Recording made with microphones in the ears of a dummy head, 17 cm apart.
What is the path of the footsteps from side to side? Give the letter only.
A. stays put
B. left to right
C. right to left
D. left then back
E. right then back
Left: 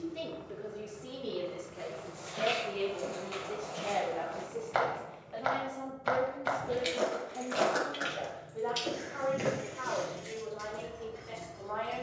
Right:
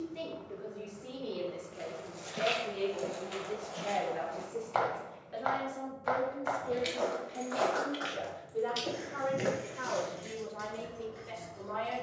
D.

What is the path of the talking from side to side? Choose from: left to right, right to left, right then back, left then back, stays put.
left to right.